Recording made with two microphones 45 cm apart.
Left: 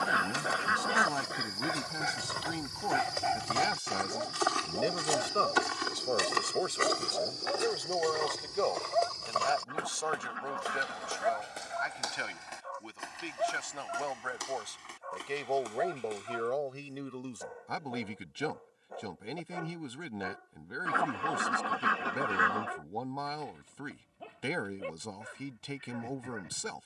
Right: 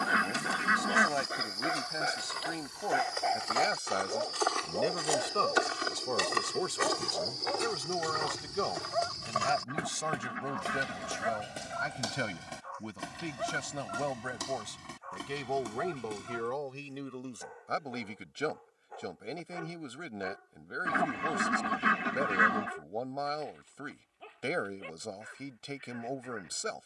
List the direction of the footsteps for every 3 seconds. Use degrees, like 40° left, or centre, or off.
70° left, 30° left, 20° right, 40° right, 60° right, 60° right, off, off, off.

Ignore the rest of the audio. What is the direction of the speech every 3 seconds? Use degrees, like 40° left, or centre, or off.
20° left, centre, 20° right, 50° right, 60° right, 10° right, 10° left, 10° left, 10° left.